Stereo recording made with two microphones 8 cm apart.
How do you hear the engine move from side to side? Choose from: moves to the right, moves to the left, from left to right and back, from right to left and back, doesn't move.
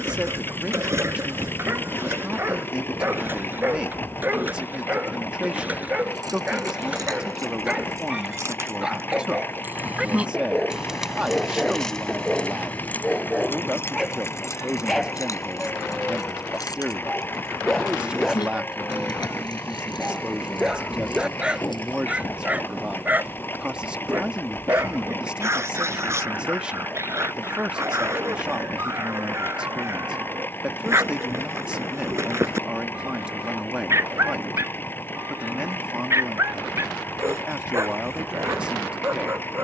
doesn't move.